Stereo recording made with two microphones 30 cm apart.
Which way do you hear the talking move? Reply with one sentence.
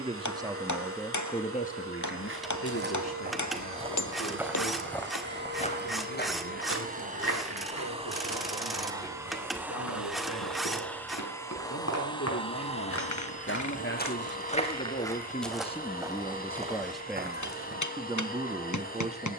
You can hear the talking move from right to left and back again.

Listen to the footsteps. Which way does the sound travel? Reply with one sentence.
You can hear the footsteps go left and come back.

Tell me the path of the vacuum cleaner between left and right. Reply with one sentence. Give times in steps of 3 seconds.
You can hear the vacuum cleaner on the right from 0 s, in the centre from 9 s and on the left from 12 s.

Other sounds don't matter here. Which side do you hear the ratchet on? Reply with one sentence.
In this clip you hear the ratchet in the centre.